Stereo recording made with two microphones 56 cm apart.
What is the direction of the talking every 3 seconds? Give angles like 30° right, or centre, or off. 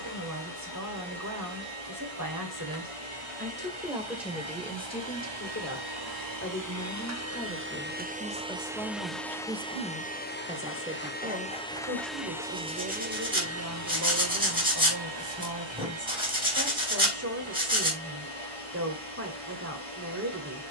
30° right, 10° left, 10° left, 10° right, 20° right, 20° right, 20° right.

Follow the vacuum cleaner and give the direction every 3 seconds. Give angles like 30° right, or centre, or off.
70° right, 50° right, 20° right, 10° left, 20° right, 60° right, 70° right.